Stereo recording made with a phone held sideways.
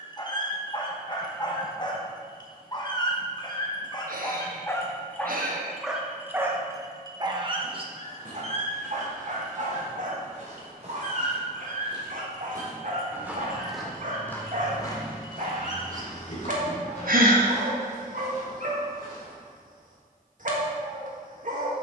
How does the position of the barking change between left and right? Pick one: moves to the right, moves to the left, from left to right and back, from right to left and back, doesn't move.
moves to the right.